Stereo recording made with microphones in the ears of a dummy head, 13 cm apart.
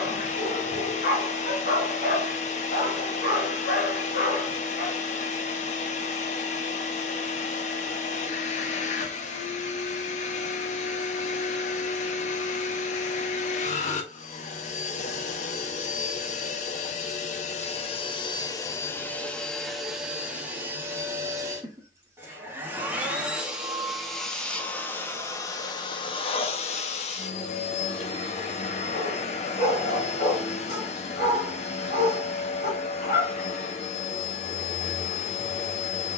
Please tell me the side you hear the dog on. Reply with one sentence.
In this clip you hear the dog on the left.